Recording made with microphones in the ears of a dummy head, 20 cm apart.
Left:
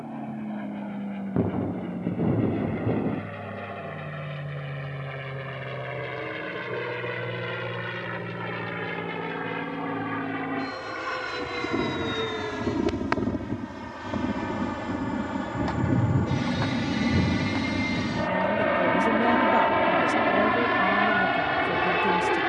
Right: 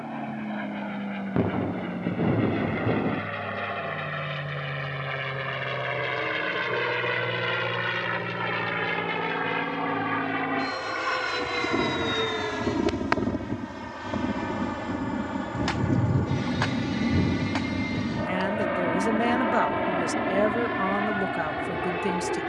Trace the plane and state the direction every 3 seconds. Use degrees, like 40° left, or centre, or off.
60° right, 50° right, 50° right, 30° right, 10° right, 10° left, 30° left, 50° left.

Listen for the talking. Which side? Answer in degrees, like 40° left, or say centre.
30° right.